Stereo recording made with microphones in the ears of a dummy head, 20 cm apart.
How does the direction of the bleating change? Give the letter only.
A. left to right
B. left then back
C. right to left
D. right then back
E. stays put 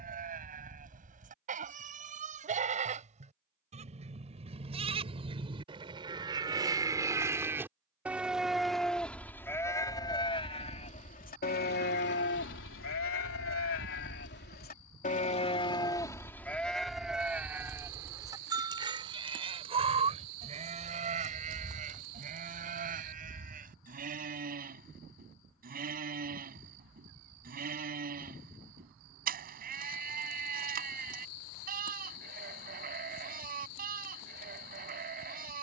B.